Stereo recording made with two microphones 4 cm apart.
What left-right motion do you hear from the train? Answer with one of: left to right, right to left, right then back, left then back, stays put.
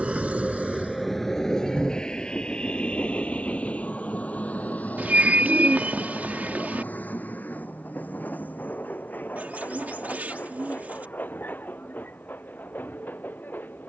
right to left.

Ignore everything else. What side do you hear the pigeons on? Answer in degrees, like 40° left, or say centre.
40° right.